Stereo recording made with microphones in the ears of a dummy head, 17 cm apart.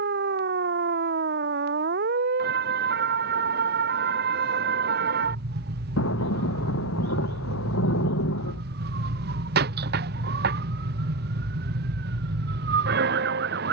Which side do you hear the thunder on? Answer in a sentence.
You can hear the thunder on the left.